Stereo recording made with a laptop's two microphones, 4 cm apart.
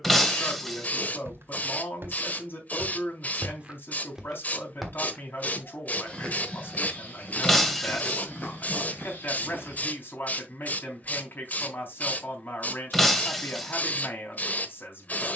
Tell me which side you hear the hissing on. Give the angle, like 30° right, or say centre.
40° left.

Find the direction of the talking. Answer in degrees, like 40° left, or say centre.
50° left.